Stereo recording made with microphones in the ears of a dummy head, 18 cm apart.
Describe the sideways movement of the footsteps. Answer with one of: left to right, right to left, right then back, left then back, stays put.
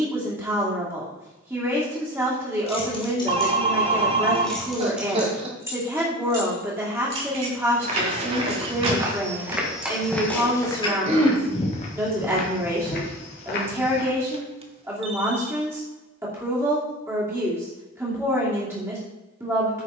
right to left.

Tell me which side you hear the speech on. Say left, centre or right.
centre.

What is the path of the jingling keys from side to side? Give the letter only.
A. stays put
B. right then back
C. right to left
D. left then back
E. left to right
B.